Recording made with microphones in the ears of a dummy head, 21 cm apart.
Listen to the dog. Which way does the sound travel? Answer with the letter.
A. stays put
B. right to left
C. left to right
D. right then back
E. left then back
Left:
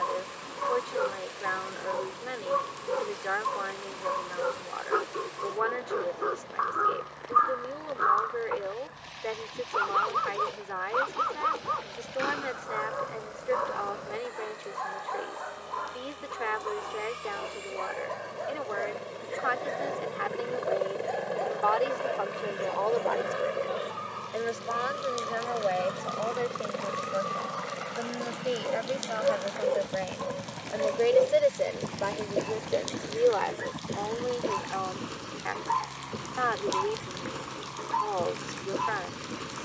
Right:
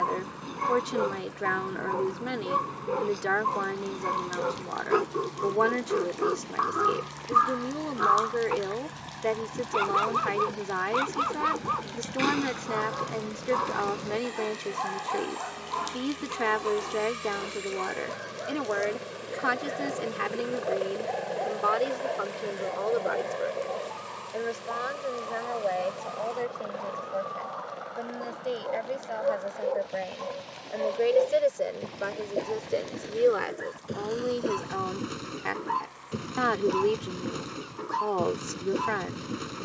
E.